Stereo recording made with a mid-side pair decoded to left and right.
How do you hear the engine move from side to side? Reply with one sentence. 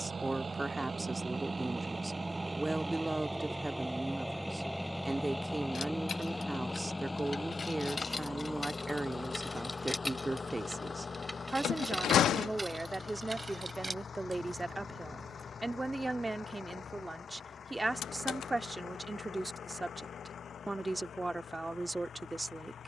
You can hear the engine move to the left.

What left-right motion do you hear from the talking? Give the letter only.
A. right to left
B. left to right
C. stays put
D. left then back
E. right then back
C.